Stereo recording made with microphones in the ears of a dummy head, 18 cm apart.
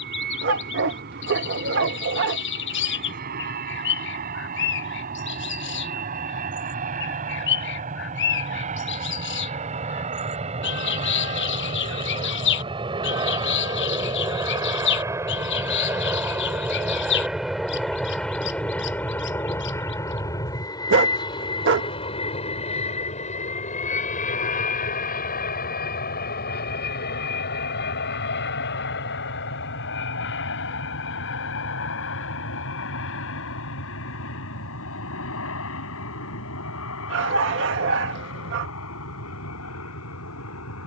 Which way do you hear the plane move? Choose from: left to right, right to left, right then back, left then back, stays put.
right to left.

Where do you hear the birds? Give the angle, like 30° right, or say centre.
60° left.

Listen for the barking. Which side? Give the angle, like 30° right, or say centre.
60° right.